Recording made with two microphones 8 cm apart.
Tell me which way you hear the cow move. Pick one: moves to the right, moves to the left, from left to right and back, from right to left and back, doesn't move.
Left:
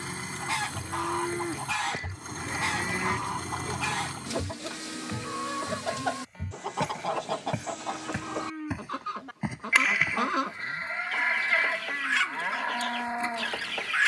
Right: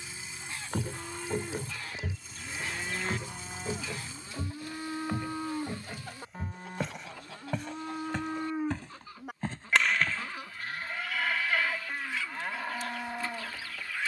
from left to right and back.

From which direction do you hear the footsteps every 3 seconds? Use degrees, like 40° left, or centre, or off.
50° right, 10° right, centre, 10° left, off.